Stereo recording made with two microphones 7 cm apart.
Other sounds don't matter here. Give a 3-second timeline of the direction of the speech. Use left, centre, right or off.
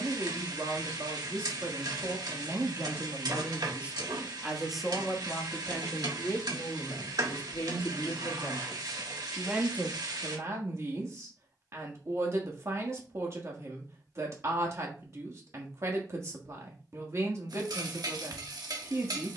right, centre, left, right, right, right, right.